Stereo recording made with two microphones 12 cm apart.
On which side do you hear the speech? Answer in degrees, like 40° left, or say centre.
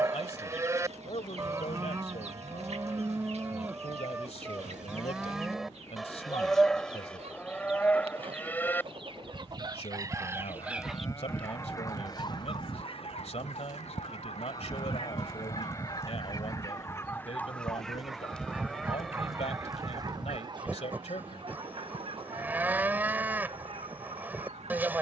60° left.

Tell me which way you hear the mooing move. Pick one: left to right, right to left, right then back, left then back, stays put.
left then back.